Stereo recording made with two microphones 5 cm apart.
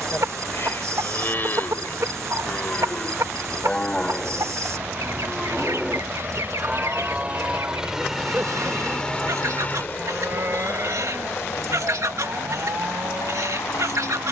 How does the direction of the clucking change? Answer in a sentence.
In this clip you hear the clucking stay in one place.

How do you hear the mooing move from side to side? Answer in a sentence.
In this clip you hear the mooing travel towards the right.